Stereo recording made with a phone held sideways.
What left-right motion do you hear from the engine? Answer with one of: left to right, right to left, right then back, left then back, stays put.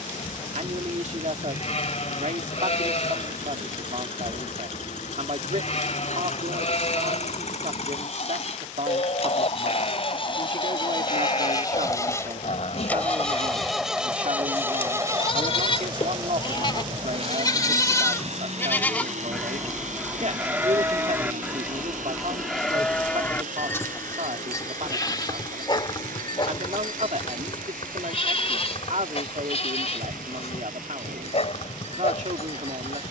left to right.